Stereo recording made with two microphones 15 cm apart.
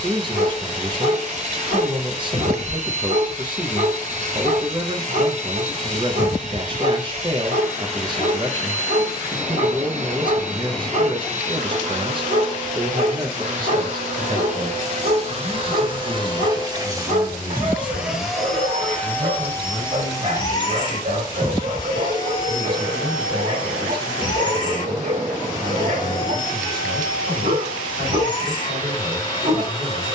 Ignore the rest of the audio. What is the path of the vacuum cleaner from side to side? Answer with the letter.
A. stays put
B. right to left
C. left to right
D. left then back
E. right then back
B.